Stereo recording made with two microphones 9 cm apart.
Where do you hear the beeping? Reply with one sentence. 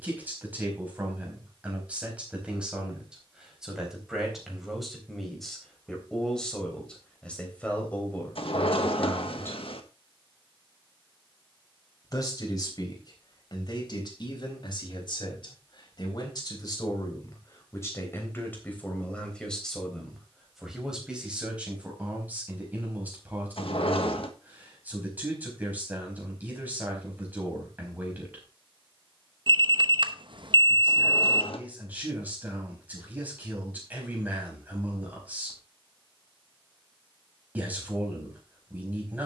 In this clip you hear the beeping on the right.